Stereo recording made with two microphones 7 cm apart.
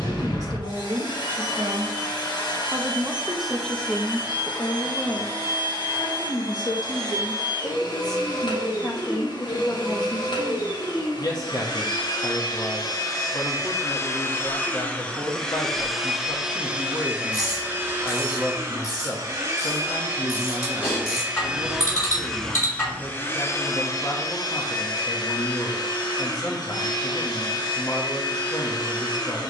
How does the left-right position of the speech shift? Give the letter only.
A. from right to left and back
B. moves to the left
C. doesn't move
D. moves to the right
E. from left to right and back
B.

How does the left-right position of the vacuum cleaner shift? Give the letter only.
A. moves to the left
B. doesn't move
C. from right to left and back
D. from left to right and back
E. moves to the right
D.